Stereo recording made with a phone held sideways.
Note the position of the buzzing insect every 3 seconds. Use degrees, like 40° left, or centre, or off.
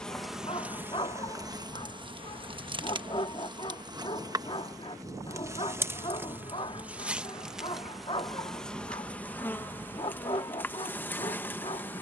20° right, 20° right, centre, 10° left.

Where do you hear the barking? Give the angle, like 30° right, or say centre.
30° left.